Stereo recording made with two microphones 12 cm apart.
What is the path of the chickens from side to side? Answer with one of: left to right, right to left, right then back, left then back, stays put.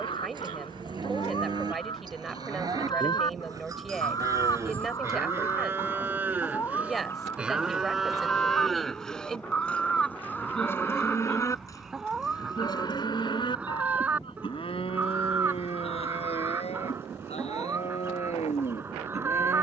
left to right.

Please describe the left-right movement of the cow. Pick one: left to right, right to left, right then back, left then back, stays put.
right to left.